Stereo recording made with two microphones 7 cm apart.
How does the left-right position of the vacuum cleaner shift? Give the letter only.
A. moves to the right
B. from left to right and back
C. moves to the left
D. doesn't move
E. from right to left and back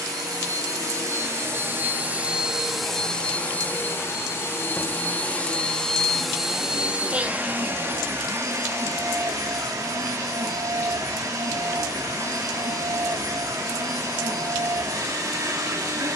E.